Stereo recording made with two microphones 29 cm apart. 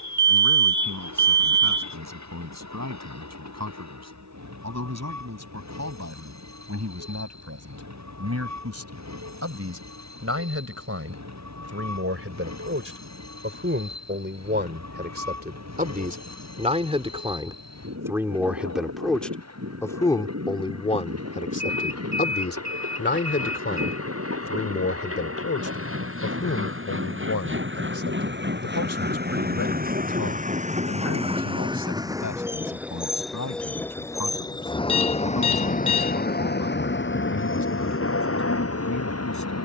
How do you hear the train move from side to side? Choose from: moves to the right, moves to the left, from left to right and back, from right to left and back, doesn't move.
moves to the left.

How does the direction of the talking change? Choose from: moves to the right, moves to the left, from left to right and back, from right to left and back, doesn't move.
moves to the left.